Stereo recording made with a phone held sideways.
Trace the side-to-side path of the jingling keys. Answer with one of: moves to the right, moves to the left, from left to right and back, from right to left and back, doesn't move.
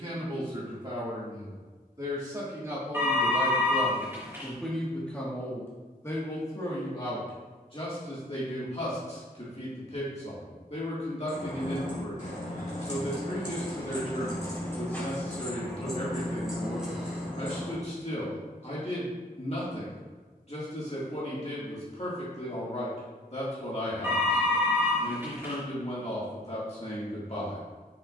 moves to the right.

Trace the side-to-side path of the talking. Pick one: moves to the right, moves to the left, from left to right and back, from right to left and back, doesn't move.
moves to the left.